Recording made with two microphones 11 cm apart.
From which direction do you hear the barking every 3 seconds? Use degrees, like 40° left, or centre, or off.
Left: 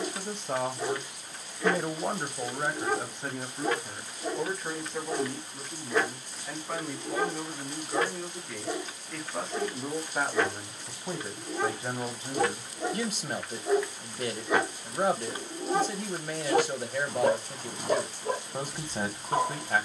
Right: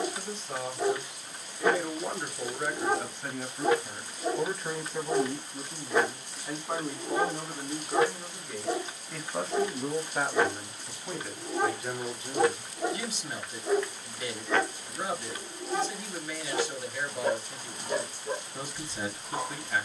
20° right, 20° right, 20° right, 20° right, centre, 50° left, 80° left.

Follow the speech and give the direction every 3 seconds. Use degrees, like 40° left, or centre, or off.
40° left, centre, 10° right, 10° left, 50° left, 50° left, 50° left.